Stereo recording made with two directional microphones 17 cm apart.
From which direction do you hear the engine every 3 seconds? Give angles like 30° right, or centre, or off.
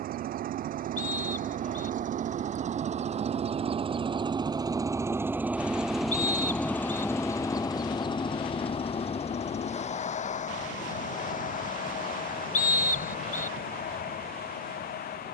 50° right, 20° right, 20° left, 50° left, 60° left.